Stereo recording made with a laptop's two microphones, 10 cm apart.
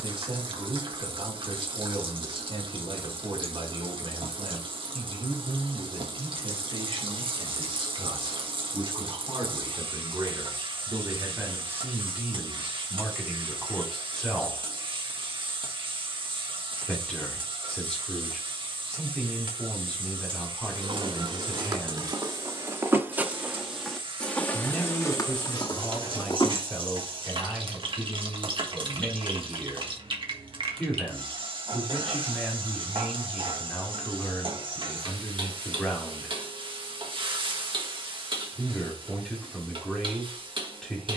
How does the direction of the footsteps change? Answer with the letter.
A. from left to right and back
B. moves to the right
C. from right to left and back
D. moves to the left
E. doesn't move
D.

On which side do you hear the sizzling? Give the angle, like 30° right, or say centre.
60° right.